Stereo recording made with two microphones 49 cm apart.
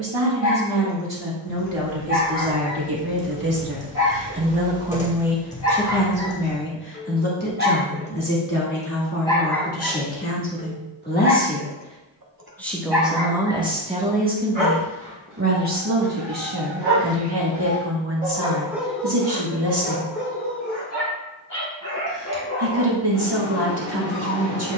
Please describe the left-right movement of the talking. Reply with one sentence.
You can hear the talking go left and come back.